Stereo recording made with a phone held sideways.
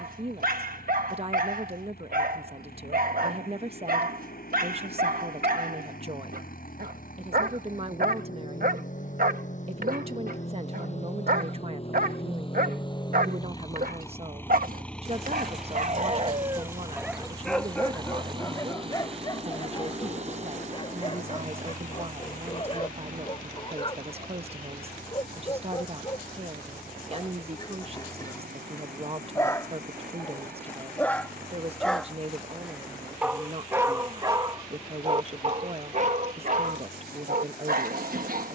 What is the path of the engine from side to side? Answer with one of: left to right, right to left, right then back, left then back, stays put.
left to right.